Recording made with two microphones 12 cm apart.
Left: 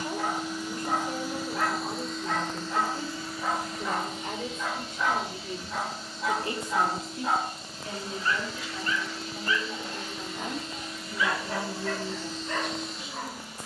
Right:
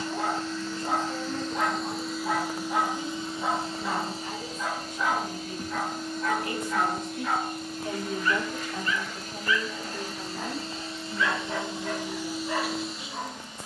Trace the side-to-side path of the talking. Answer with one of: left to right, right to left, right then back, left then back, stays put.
right then back.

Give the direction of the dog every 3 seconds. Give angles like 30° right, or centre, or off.
20° right, centre, 30° left, 10° left, 10° right.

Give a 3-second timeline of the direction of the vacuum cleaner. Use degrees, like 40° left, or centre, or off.
centre, 40° right, 50° right, 30° right, centre.